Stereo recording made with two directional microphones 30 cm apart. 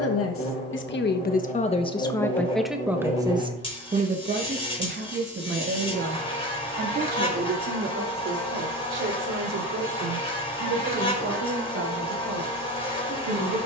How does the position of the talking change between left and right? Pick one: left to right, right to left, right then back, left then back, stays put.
left to right.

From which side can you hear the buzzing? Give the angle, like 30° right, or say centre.
20° left.